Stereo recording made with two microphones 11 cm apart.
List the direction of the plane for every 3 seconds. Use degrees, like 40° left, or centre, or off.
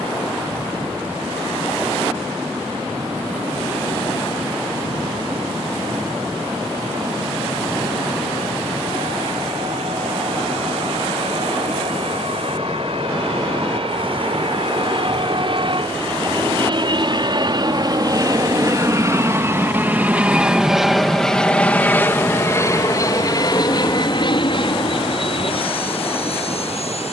80° right, 80° right, 70° right, 70° right, 60° right, 50° right, 20° right, 20° left, 50° left.